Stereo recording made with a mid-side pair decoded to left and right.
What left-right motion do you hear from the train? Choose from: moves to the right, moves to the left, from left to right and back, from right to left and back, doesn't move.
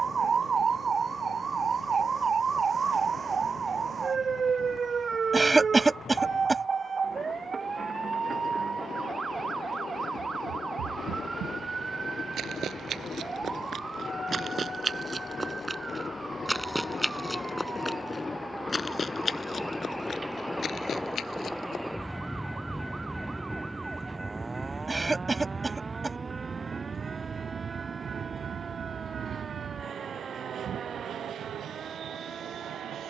moves to the right.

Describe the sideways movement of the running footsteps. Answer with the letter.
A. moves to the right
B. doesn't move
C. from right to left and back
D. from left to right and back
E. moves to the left
E.